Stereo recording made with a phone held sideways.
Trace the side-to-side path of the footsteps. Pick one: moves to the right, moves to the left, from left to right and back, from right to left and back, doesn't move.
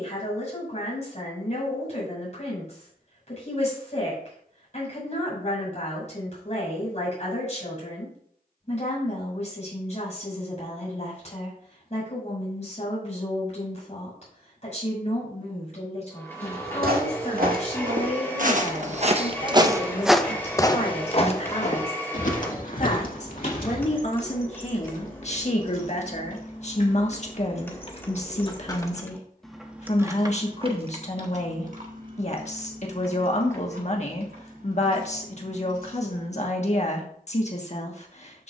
moves to the left.